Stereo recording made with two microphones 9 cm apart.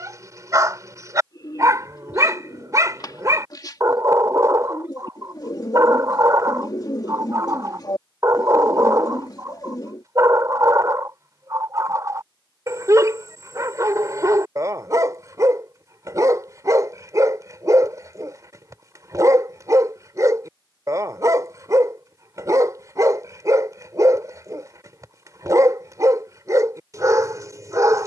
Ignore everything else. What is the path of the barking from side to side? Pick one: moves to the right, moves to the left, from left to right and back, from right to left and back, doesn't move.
doesn't move.